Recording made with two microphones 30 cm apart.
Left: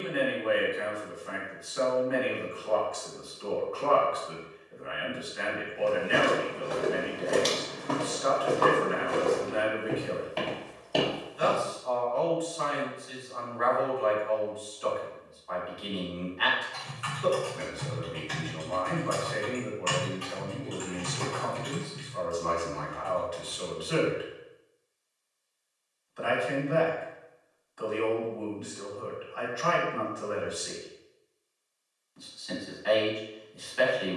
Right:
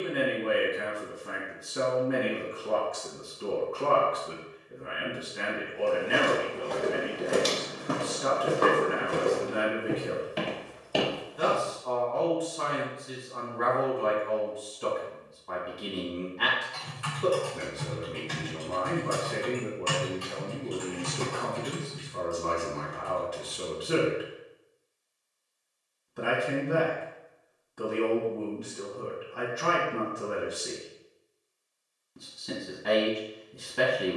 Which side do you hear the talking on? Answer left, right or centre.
right.